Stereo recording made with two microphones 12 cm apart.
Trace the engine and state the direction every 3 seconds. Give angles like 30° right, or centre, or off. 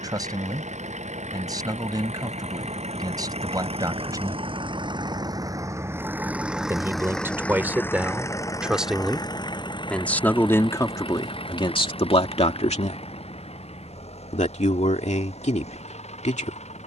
70° right, 40° right, 10° left, 40° left, 60° left, 60° left.